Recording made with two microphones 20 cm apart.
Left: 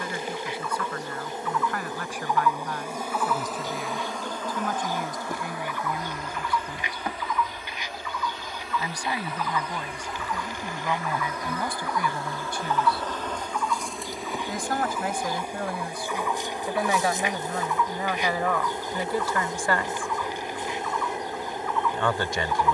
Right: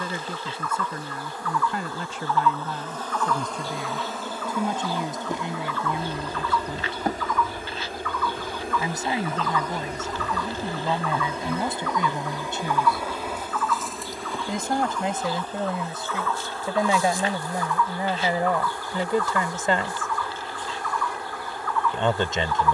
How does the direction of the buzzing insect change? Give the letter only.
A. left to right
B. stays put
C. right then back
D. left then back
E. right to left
C.